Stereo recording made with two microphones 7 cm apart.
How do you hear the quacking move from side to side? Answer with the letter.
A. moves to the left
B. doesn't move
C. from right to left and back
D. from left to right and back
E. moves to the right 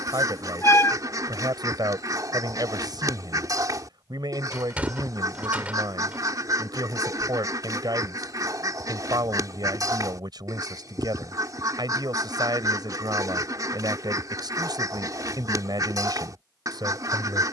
B.